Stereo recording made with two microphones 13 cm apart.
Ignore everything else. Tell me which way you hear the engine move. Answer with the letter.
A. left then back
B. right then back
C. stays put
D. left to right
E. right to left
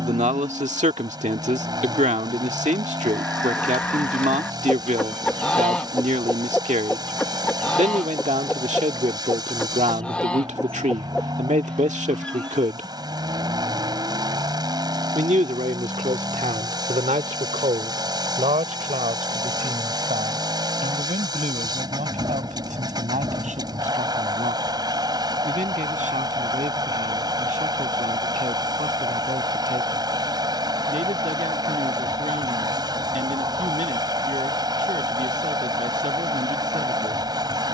C.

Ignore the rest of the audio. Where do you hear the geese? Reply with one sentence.
You can hear the geese in the centre.